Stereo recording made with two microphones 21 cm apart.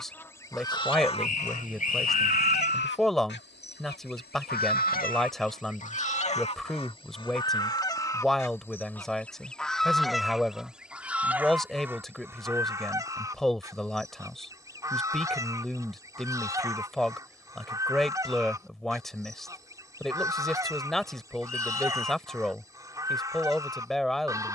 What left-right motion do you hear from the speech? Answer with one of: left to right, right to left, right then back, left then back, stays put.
stays put.